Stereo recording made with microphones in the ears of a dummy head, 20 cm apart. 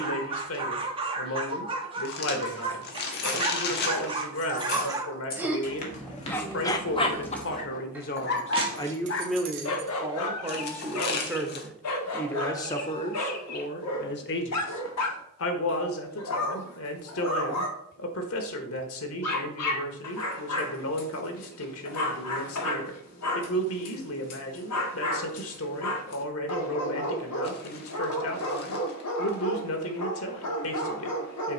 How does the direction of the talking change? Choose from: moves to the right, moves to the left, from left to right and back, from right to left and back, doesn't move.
from left to right and back.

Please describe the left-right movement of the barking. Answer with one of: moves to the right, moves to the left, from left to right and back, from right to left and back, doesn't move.
moves to the left.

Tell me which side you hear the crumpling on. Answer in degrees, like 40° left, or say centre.
50° left.